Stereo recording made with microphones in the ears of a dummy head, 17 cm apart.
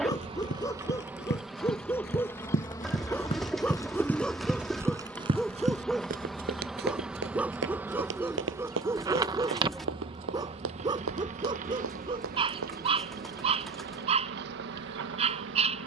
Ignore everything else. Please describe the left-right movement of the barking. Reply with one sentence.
In this clip you hear the barking go from the left side to the right.